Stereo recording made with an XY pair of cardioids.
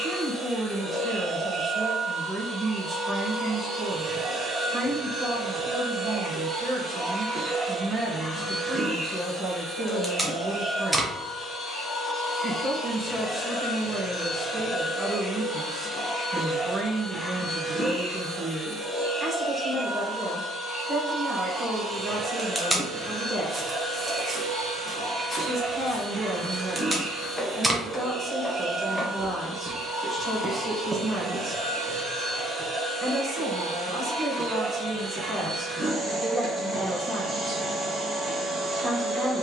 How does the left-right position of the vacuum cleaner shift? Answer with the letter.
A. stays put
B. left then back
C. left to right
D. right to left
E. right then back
B.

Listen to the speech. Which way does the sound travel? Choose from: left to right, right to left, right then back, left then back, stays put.
stays put.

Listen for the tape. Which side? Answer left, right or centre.
centre.